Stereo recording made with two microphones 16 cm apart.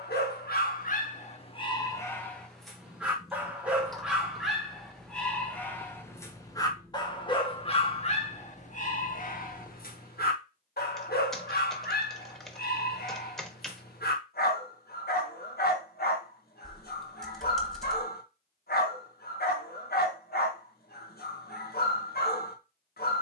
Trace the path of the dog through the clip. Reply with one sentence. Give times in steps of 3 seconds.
In this clip you hear the dog on the left from 0 s, in the centre from 3 s and on the left from 6 s.